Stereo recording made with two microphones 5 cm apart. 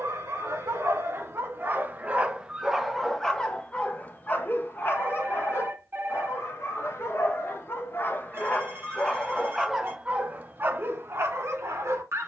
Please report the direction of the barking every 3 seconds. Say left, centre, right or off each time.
right, left, left, right.